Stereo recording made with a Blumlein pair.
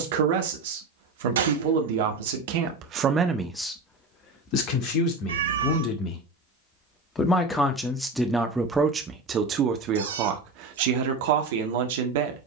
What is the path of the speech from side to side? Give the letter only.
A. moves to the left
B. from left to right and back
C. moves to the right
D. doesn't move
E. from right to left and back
E.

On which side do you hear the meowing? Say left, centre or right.
right.